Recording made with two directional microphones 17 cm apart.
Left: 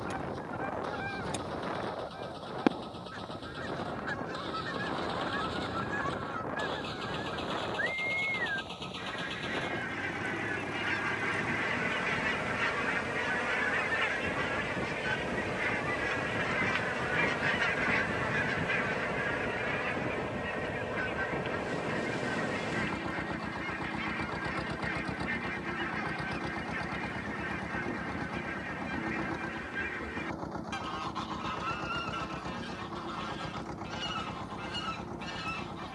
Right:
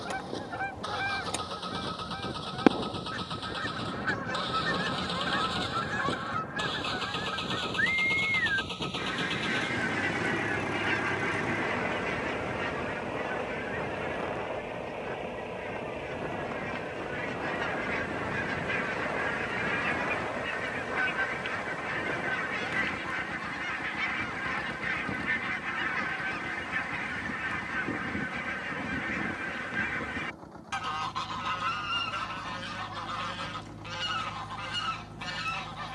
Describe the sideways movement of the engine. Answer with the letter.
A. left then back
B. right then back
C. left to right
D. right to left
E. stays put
D.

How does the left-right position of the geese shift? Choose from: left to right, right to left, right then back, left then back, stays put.
left then back.